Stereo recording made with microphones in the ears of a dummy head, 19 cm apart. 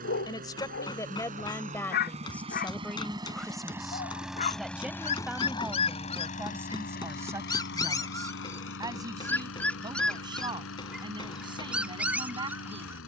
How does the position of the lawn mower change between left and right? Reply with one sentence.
You can hear the lawn mower go from the right side to the left.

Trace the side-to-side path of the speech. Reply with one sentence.
In this clip you hear the speech travel towards the right.